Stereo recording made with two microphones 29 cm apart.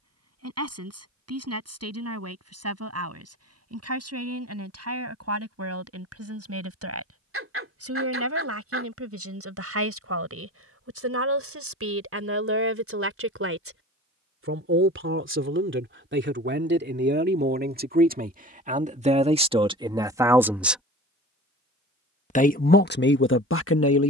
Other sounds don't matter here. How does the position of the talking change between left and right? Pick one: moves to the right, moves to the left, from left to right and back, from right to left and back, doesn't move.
moves to the left.